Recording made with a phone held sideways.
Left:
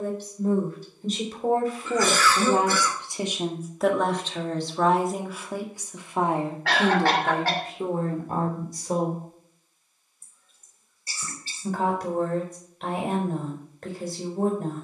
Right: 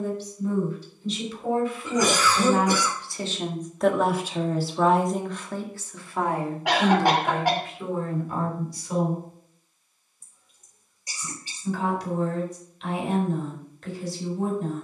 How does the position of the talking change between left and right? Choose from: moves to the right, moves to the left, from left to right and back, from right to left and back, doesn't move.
from left to right and back.